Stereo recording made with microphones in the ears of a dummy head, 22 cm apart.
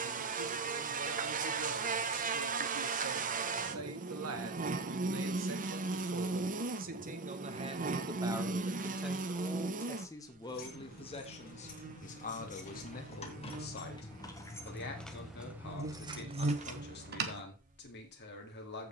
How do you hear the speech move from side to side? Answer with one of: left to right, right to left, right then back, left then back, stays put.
right to left.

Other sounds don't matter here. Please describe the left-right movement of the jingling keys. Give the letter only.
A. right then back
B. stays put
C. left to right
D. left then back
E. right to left
C.